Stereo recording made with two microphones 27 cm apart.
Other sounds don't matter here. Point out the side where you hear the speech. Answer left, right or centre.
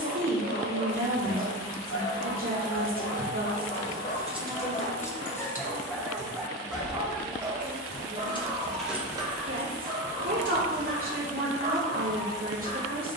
right.